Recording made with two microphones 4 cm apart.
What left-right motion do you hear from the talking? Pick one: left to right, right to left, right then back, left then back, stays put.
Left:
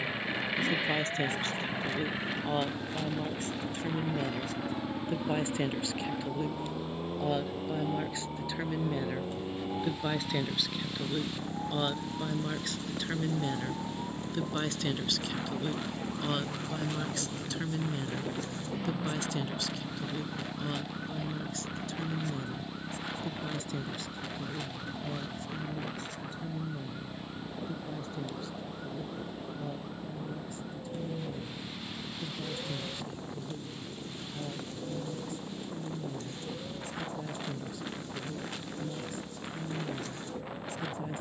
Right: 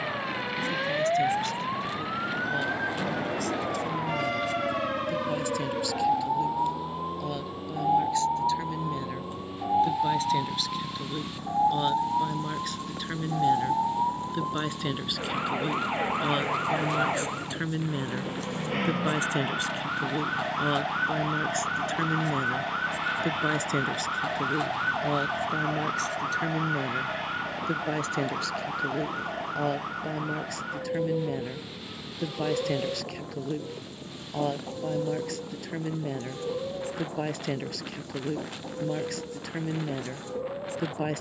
left to right.